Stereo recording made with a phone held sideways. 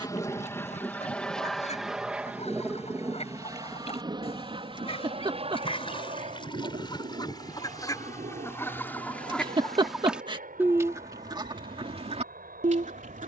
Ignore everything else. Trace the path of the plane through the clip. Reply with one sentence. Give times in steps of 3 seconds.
You can hear the plane in the centre from 0 s and on the right from 3 s.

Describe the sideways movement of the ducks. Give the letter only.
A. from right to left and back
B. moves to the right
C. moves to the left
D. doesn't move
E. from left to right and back
B.